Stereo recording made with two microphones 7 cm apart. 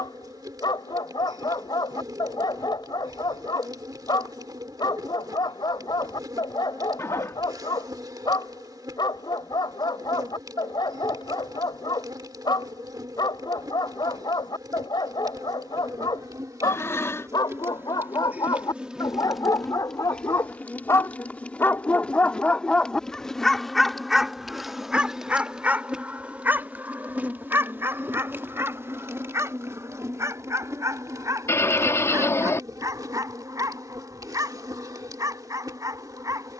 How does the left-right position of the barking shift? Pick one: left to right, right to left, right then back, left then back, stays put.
left to right.